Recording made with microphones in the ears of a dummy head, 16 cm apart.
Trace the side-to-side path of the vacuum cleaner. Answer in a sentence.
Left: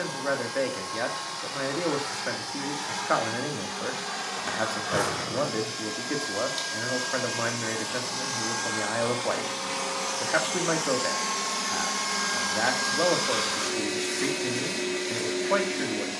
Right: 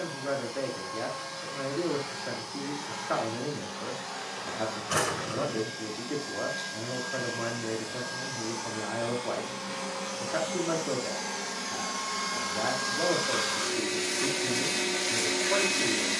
You can hear the vacuum cleaner move from left to right.